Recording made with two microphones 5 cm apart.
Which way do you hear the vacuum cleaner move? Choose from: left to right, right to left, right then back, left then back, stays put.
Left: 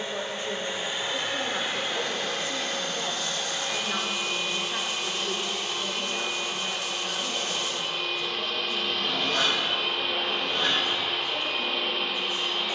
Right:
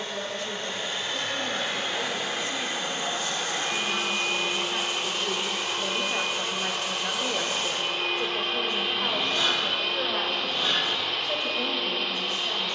right then back.